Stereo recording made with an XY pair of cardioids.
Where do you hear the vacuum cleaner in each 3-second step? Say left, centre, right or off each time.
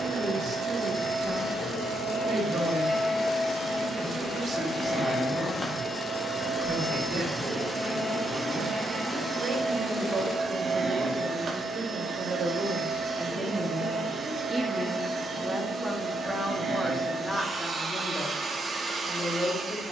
left, left, centre, right, right, right, right.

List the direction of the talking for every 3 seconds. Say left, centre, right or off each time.
right, right, right, right, right, centre, left.